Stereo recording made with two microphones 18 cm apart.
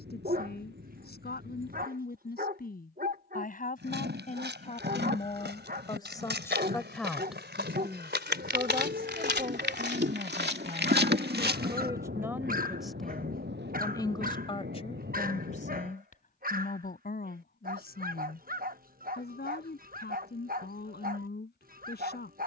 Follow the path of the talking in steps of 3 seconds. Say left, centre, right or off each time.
left, left, centre, right, centre, left, left, left.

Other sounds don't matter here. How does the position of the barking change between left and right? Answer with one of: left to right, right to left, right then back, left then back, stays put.
stays put.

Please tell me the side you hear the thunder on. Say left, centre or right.
right.